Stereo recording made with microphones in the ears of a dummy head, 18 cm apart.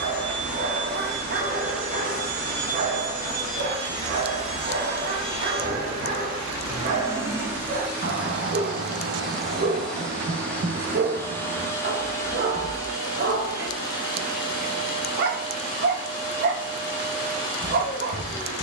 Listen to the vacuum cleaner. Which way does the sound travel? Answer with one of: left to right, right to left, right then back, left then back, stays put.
right to left.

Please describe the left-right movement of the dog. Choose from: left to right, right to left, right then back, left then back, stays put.
stays put.